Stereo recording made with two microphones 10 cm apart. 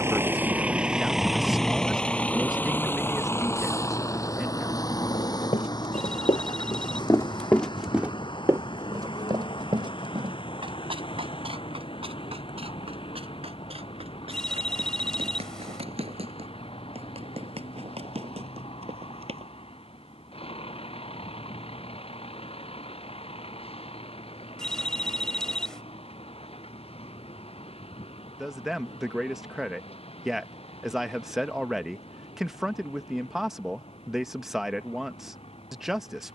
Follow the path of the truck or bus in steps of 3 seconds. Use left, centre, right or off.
centre, left, left, left, left, left, left, left, left, left, left, left.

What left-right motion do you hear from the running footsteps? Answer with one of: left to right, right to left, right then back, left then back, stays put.
left to right.